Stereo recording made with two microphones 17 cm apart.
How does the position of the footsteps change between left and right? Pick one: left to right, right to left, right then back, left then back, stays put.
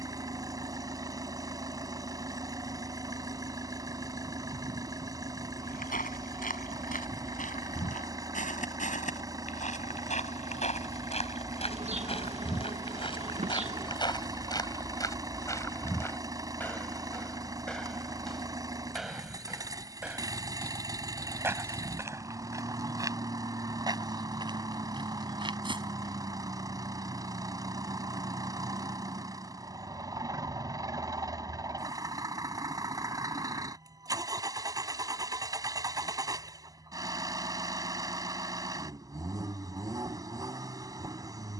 left to right.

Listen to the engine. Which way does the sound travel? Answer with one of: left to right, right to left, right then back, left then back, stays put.
stays put.